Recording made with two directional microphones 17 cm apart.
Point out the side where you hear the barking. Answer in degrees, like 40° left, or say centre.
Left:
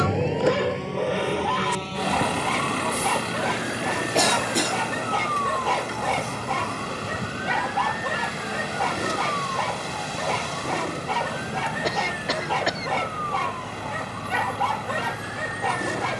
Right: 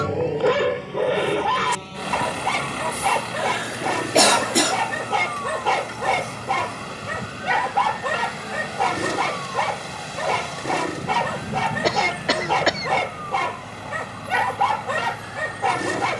20° right.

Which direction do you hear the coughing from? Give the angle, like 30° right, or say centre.
30° right.